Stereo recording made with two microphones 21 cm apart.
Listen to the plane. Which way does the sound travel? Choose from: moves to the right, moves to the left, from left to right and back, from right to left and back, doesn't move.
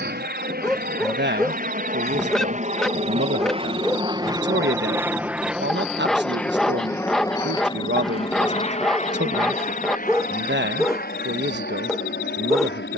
moves to the left.